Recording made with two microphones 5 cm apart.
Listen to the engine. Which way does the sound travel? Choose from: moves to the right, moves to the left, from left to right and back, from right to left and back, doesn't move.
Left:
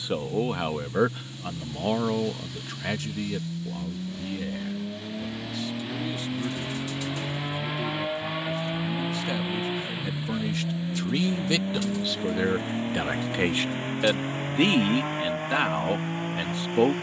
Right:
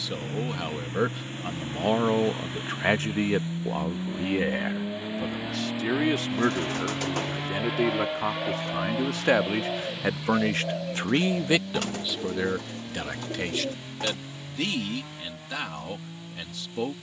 moves to the left.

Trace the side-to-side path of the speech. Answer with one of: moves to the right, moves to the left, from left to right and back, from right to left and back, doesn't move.
from left to right and back.